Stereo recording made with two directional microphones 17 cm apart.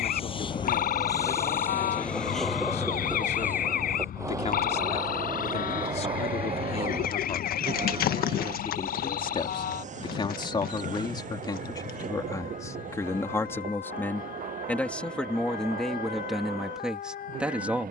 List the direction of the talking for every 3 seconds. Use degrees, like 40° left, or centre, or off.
40° left, 40° left, 40° left, 30° left, 10° left, centre.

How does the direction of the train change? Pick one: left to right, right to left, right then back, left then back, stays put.
left to right.